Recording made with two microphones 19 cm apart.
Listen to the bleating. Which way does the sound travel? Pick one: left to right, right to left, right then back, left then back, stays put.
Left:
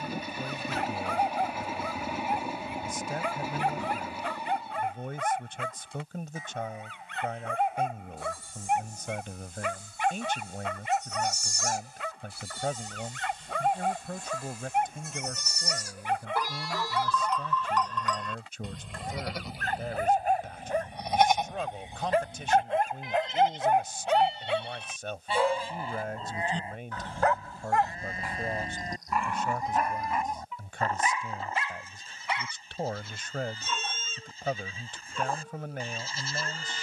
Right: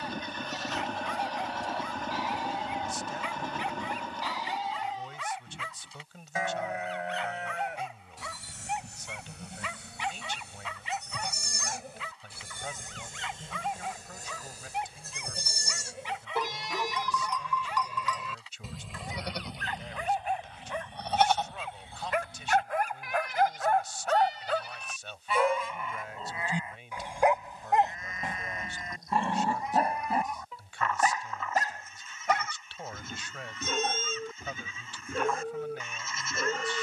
right to left.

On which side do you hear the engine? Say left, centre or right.
centre.